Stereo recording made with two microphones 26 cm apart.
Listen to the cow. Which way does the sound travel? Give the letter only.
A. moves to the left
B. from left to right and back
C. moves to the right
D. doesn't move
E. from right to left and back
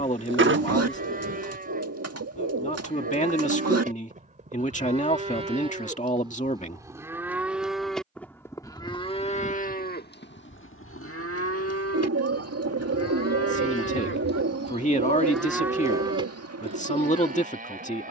E.